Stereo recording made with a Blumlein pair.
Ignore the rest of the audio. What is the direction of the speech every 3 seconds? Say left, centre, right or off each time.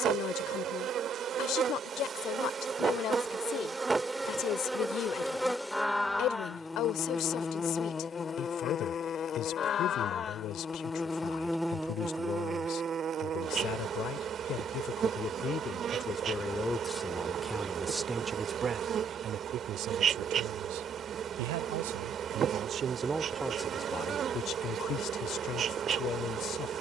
left, left, left, left, left, centre, right, right, left.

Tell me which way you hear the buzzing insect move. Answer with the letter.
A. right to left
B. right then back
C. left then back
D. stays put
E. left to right
C.